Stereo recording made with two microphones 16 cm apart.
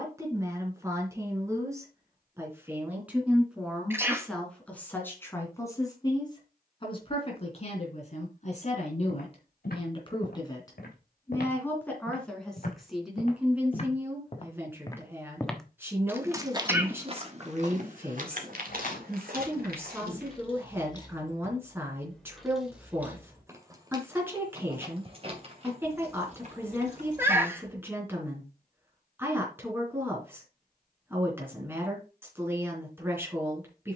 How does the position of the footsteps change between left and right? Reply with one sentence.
In this clip you hear the footsteps travel towards the right.